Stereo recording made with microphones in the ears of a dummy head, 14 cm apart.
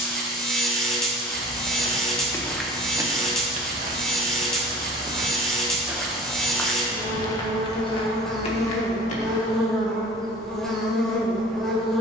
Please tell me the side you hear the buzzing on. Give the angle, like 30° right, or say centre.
centre.